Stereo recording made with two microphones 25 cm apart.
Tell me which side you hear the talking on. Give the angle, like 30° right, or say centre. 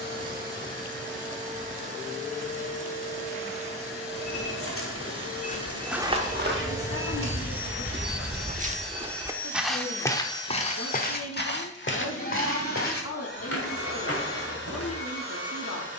70° left.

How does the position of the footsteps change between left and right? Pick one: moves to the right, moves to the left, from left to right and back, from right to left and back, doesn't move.
from left to right and back.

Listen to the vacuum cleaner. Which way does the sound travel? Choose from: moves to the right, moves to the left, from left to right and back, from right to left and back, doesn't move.
moves to the left.